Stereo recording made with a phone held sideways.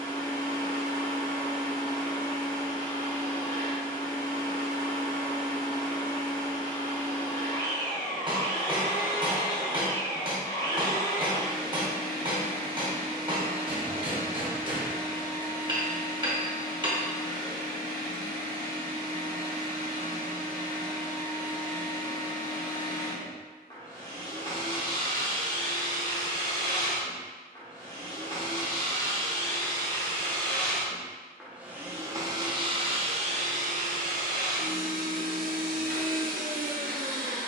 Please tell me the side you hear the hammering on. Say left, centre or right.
right.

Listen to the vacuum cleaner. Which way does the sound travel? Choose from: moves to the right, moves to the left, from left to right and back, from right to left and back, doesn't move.
moves to the right.